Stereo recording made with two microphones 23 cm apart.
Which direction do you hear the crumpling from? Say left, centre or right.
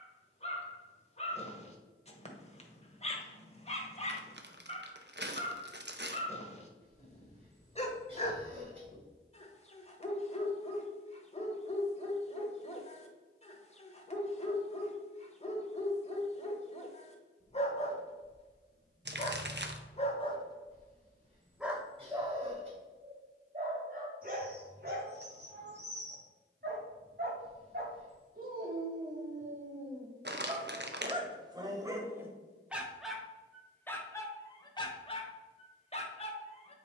right.